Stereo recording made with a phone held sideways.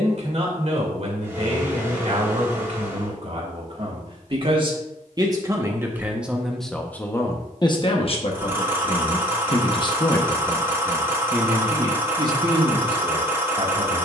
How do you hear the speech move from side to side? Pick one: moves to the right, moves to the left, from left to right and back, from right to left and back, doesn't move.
from right to left and back.